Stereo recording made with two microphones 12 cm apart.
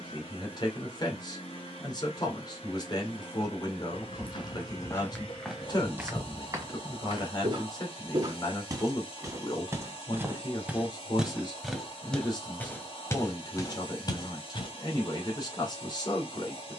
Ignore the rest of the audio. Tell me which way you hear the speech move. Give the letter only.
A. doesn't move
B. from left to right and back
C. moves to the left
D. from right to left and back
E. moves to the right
A.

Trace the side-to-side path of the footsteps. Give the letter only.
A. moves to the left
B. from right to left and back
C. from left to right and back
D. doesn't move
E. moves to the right
C.